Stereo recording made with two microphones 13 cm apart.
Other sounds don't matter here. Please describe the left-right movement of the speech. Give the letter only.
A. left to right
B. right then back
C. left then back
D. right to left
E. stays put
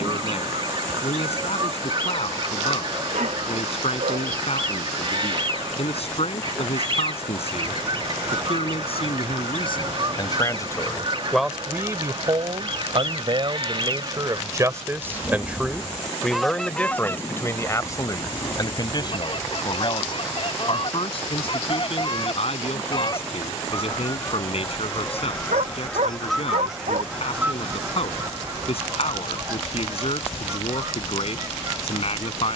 B.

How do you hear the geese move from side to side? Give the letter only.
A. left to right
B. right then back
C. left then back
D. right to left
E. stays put
C.